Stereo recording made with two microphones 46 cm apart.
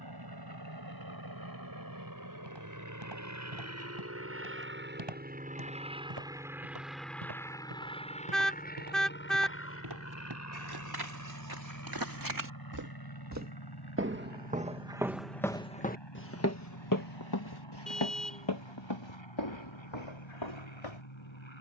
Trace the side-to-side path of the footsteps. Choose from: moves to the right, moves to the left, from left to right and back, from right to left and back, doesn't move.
moves to the left.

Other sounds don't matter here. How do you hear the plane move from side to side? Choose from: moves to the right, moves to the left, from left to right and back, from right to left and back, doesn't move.
moves to the left.